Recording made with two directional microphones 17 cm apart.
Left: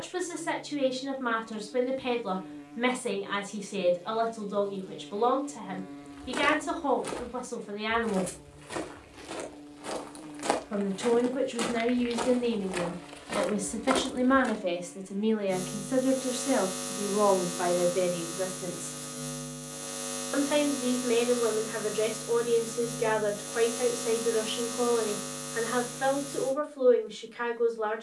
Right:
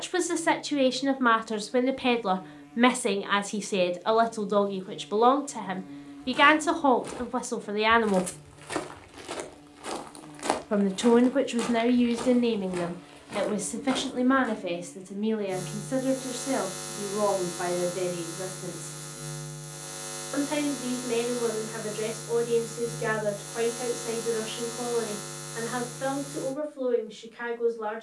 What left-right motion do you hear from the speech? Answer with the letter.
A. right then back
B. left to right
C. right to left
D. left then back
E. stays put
C.